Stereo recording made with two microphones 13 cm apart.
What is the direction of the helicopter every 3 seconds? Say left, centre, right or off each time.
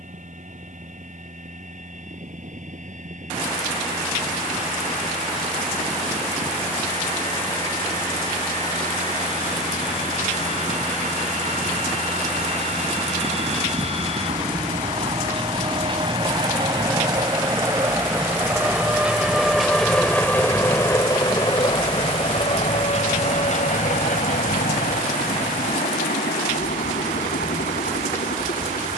right, right, right, right, right, right, centre, left, left, left.